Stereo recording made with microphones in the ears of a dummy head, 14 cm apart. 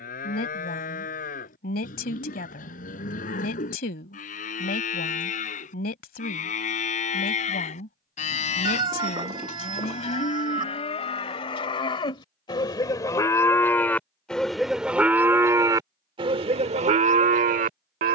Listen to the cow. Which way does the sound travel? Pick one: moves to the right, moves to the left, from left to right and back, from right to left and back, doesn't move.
moves to the right.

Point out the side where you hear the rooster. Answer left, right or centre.
right.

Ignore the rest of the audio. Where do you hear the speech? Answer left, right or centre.
left.